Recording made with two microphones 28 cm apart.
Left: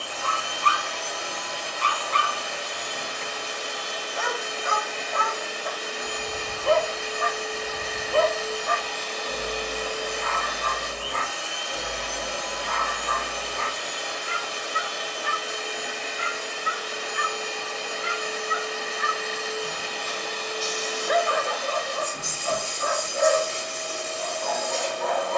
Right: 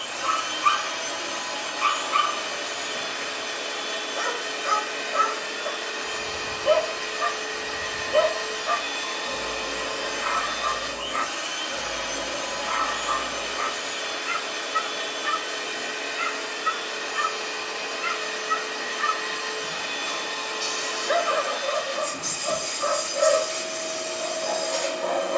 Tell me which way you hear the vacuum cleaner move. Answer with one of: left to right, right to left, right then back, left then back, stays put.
stays put.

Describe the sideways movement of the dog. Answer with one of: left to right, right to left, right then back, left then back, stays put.
stays put.